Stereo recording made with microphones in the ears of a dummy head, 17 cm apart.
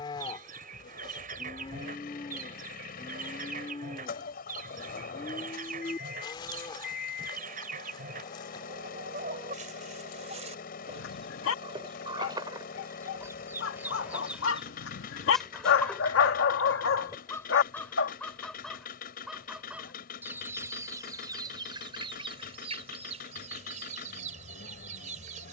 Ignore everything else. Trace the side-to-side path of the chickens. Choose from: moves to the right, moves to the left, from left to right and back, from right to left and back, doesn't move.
from right to left and back.